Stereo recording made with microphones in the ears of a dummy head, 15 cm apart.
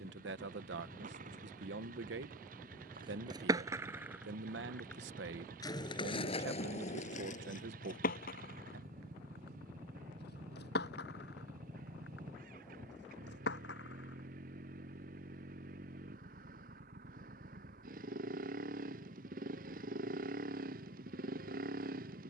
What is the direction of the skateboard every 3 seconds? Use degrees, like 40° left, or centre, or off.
50° right, 10° right, 50° left, 70° left, 80° left, off, off, off.